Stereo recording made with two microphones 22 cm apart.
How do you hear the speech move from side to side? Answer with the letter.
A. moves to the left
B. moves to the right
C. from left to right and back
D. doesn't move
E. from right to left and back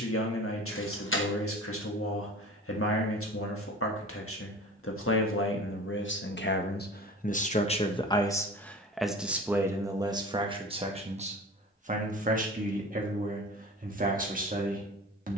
B.